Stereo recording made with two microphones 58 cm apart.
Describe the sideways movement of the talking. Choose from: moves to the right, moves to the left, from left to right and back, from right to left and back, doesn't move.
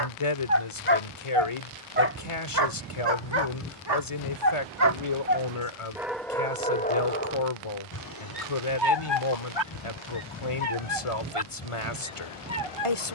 doesn't move.